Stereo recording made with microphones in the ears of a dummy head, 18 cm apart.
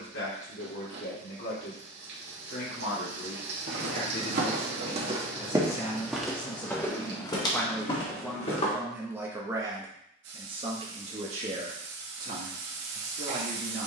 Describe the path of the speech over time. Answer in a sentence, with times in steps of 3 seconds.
In this clip you hear the speech on the left from 0 s, in the centre from 6 s and on the right from 9 s.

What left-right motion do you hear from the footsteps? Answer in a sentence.
In this clip you hear the footsteps go from the right side to the left.